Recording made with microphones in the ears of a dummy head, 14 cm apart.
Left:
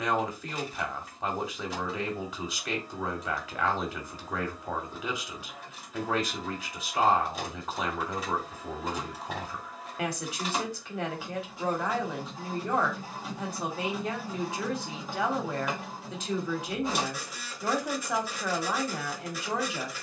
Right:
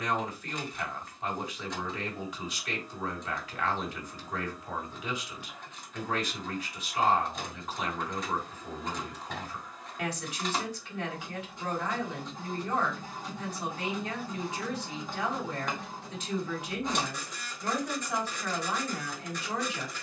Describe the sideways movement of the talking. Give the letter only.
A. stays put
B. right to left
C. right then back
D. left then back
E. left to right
A.